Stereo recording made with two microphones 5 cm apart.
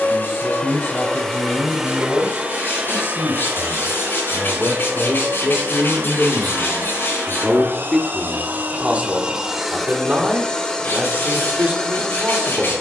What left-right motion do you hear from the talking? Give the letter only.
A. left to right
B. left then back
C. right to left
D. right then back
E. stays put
A.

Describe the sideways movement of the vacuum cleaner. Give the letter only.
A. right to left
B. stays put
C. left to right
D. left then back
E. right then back
E.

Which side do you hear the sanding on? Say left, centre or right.
left.